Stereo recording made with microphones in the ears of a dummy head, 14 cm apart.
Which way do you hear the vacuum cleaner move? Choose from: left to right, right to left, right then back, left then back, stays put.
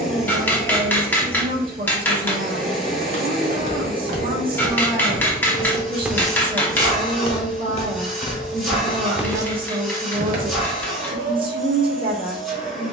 stays put.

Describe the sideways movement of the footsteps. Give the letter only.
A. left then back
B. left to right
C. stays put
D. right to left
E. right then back
A.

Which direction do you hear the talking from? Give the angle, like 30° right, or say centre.
40° right.